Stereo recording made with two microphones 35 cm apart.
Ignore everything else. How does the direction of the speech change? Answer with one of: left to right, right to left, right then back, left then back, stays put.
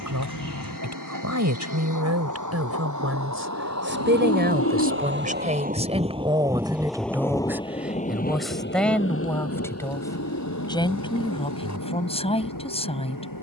right to left.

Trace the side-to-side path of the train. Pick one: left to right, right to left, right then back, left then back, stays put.
right to left.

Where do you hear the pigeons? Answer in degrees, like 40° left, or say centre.
50° left.